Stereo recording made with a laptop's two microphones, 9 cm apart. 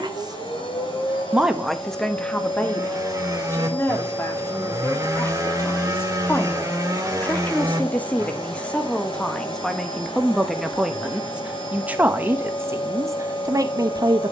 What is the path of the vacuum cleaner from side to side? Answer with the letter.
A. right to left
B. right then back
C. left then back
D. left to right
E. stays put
E.